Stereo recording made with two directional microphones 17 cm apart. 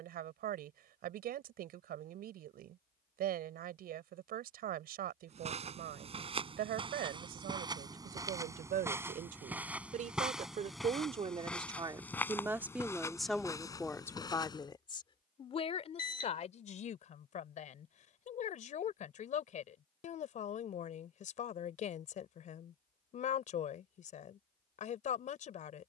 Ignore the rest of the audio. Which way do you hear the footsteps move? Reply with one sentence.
You can hear the footsteps go from the right side to the left.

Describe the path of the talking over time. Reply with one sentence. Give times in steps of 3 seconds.
In this clip you hear the talking on the right from 0 s, in the centre from 12 s and on the left from 15 s.